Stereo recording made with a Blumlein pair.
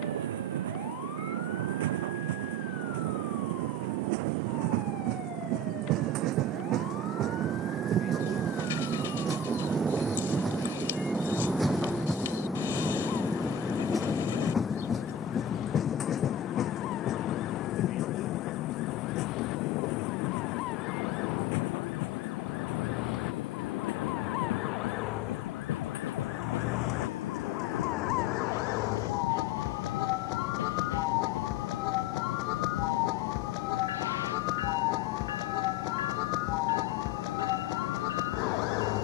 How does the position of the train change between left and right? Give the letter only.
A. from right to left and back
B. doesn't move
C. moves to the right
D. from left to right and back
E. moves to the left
E.